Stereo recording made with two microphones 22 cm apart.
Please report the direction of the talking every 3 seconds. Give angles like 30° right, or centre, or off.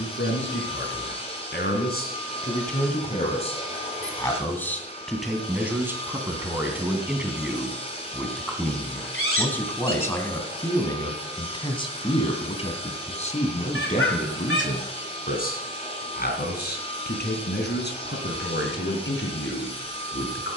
50° left, 10° left, centre, 10° left, 30° left, 50° left, 60° left.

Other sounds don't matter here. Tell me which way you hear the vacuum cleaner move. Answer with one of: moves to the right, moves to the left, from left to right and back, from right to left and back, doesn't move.
doesn't move.